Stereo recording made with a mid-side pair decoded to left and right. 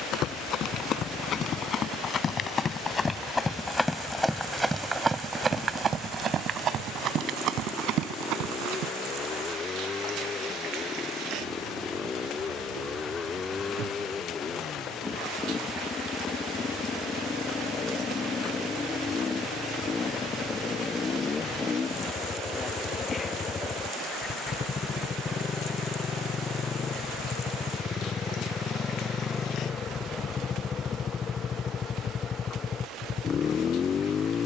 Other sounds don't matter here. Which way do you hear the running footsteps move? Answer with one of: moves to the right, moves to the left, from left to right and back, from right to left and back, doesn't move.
moves to the right.